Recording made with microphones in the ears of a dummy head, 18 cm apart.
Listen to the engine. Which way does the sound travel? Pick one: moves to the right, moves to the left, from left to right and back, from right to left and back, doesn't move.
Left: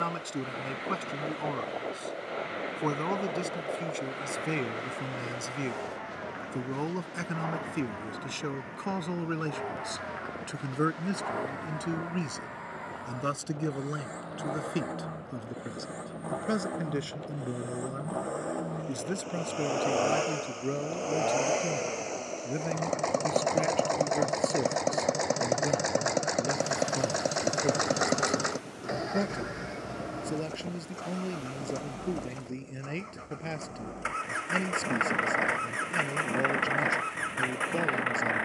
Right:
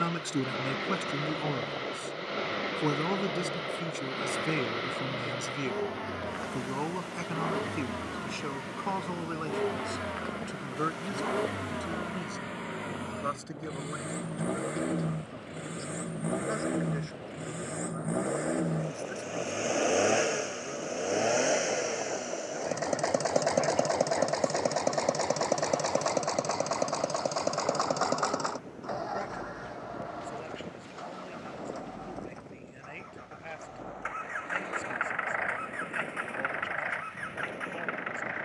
moves to the left.